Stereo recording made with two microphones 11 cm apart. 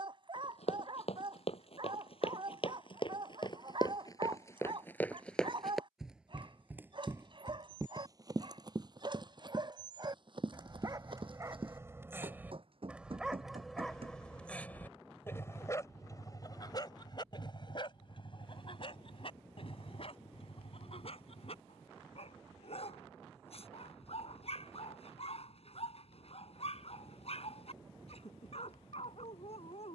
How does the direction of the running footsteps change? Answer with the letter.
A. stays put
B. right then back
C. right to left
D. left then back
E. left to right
E.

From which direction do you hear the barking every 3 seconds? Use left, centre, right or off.
right, right, right, right, centre, left, left, left, left, left.